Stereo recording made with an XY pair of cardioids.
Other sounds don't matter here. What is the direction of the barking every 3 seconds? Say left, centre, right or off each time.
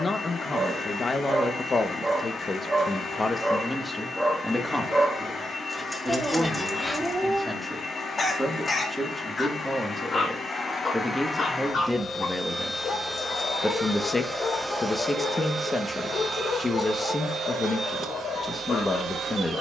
right, centre, left, left, left, left, left.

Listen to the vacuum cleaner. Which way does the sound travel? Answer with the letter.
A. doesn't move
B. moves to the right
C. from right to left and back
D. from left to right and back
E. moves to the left
B.